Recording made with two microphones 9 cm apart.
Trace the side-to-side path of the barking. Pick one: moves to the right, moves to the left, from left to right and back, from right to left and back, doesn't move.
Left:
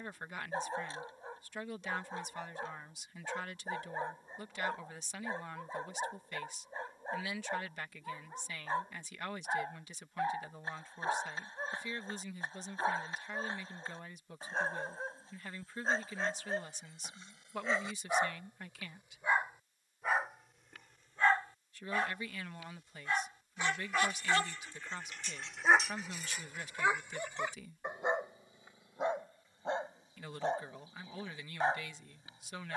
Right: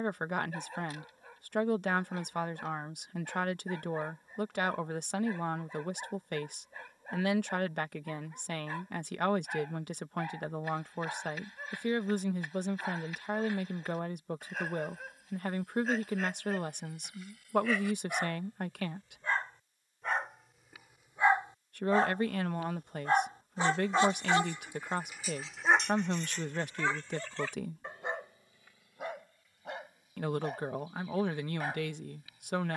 from left to right and back.